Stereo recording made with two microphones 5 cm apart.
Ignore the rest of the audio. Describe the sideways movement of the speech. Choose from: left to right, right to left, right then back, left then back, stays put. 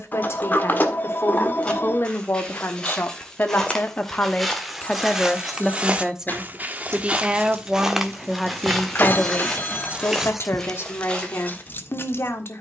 right then back.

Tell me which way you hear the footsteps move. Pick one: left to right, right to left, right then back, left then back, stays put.
right then back.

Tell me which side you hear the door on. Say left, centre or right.
left.